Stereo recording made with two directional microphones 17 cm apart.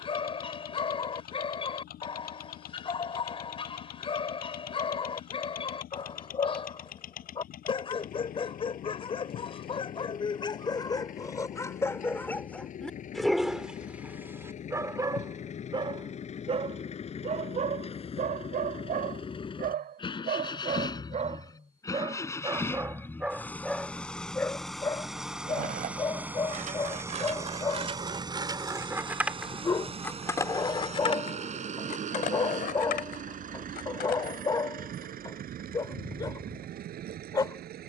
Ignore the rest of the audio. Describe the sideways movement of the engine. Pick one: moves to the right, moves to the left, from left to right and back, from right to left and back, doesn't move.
moves to the right.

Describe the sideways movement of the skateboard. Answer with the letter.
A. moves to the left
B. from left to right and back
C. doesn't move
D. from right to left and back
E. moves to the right
A.